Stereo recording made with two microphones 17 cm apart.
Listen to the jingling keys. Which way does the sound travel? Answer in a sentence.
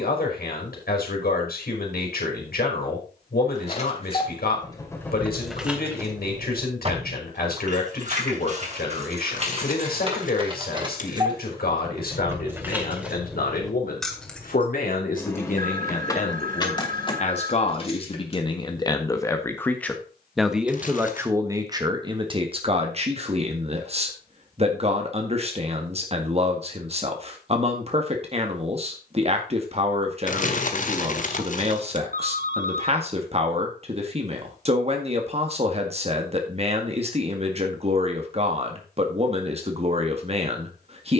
In this clip you hear the jingling keys move from left to right and back again.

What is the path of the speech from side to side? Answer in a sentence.
In this clip you hear the speech go from the left side to the right.